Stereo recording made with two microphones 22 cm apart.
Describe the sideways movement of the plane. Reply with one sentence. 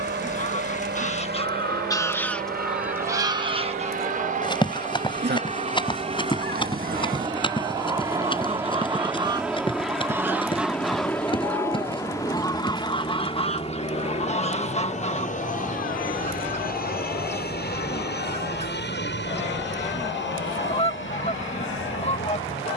In this clip you hear the plane go from the right side to the left.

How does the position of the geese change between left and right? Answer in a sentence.
In this clip you hear the geese go right and come back.